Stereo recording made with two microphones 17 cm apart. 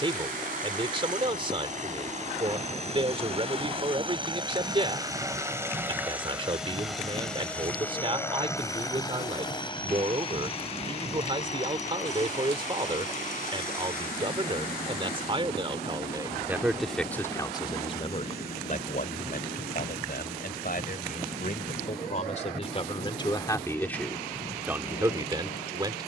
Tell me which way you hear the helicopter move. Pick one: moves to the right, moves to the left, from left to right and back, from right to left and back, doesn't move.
moves to the left.